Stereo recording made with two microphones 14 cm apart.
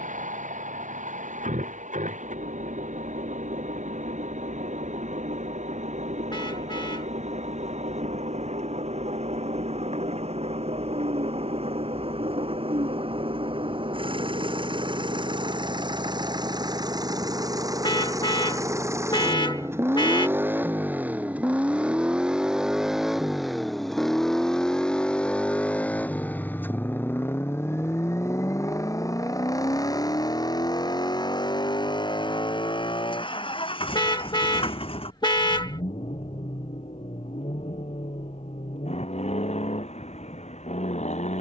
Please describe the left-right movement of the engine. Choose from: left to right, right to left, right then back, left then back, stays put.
right to left.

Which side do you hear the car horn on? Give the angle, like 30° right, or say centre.
30° left.